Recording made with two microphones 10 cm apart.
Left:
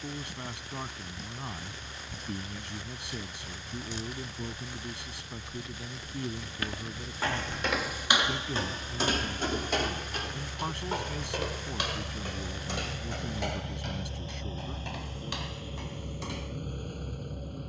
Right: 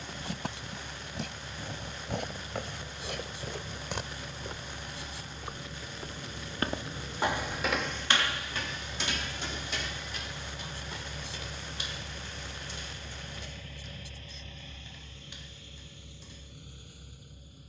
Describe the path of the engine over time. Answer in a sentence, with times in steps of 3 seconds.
In this clip you hear the engine on the right from 0 s, in the centre from 9 s and on the left from 12 s.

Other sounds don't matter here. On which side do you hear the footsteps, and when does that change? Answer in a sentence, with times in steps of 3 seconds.
You can hear the footsteps on the right from 0 s, in the centre from 6 s and on the left from 9 s.